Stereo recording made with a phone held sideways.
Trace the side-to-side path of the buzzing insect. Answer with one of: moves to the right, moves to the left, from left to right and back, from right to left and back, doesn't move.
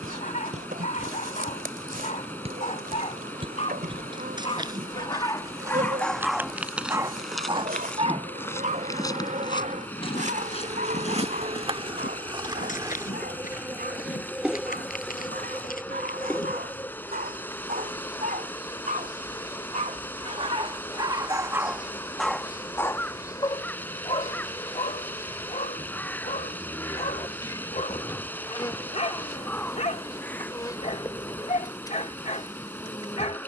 moves to the left.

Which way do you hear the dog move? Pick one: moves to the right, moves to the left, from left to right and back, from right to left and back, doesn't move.
from left to right and back.